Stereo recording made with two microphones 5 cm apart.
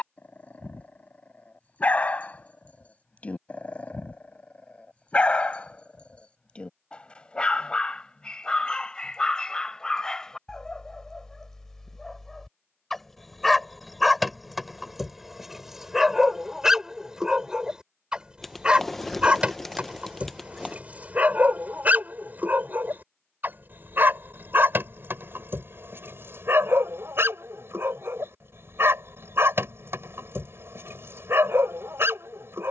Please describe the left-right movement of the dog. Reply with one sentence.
You can hear the dog go from the left side to the right.